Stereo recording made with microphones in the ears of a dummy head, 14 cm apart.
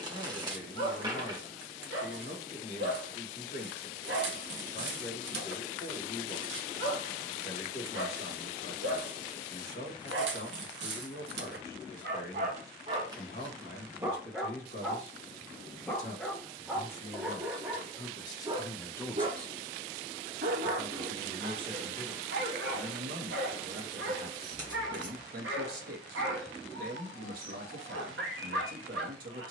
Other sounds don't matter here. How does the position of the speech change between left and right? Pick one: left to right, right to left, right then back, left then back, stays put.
left to right.